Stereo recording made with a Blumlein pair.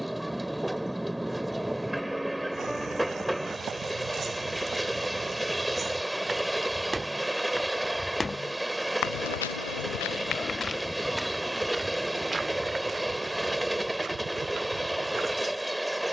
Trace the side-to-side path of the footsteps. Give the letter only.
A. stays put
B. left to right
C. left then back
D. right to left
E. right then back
C.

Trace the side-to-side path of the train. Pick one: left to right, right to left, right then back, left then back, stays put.
stays put.